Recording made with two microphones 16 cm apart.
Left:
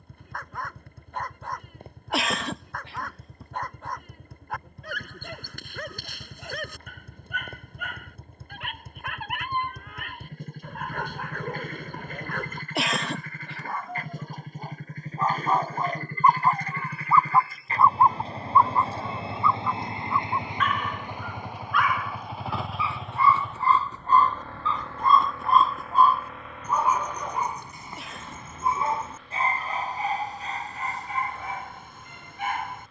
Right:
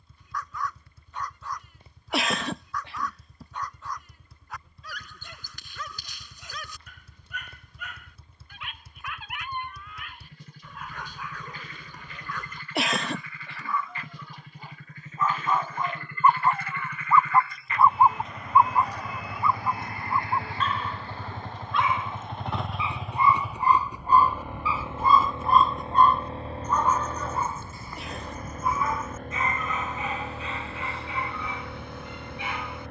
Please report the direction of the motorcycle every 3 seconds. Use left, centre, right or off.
left, left, left, left, left, left, left, centre, right, right, right.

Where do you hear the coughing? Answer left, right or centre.
centre.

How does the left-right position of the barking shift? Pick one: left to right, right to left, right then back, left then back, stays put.
right then back.